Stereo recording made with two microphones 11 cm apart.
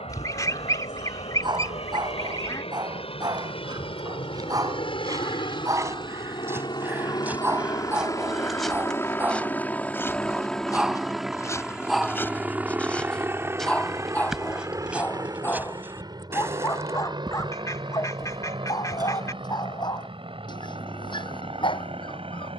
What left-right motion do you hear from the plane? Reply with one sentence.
In this clip you hear the plane travel towards the right.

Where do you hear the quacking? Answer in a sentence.
In this clip you hear the quacking on the left.